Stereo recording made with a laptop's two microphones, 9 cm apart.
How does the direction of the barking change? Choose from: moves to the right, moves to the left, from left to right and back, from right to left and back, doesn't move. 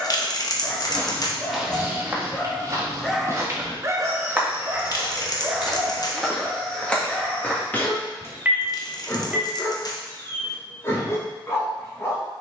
from left to right and back.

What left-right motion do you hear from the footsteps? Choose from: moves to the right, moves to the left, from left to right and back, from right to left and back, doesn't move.
from left to right and back.